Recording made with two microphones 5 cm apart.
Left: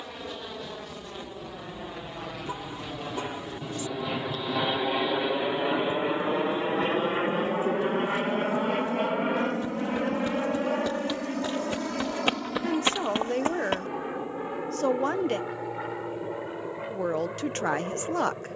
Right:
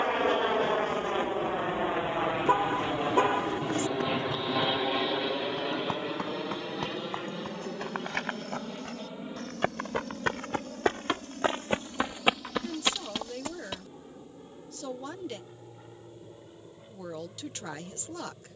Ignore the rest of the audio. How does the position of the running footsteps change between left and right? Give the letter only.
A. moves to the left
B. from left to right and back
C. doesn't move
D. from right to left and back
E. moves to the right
A.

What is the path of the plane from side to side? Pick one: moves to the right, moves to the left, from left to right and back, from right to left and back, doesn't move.
moves to the left.